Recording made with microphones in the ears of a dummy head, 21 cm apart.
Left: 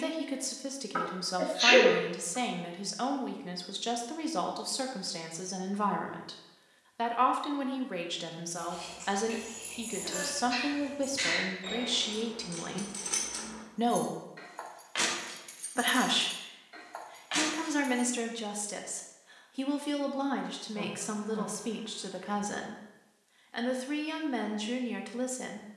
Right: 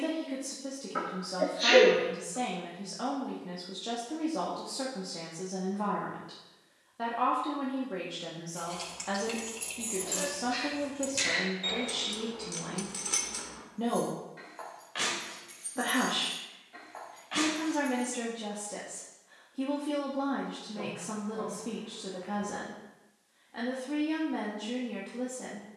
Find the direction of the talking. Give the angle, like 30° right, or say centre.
60° left.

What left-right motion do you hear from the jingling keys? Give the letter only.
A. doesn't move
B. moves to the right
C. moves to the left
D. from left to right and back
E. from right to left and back
C.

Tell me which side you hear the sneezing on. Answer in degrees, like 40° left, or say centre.
50° left.